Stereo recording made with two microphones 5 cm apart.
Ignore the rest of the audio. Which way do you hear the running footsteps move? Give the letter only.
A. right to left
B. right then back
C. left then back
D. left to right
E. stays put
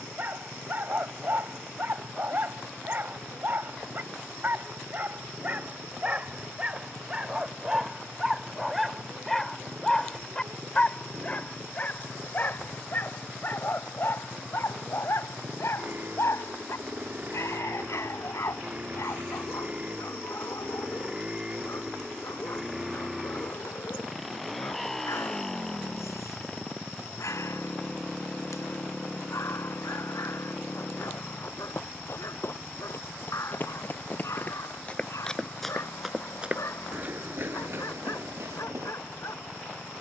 D.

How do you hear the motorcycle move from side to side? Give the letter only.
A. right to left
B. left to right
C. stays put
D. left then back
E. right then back
A.